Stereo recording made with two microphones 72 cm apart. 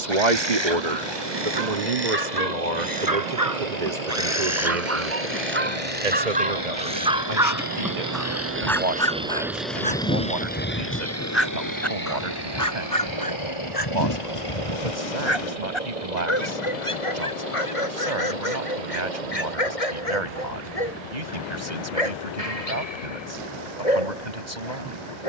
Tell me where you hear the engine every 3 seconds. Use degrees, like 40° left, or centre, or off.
70° right, 60° right, 30° right, 10° left, 40° left, 50° left, 60° left, 60° left, 70° left.